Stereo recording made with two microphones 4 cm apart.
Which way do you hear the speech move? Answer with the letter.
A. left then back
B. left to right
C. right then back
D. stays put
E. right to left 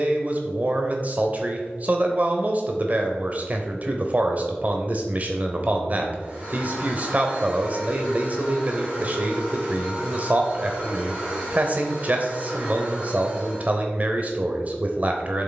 D.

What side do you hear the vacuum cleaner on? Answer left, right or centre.
right.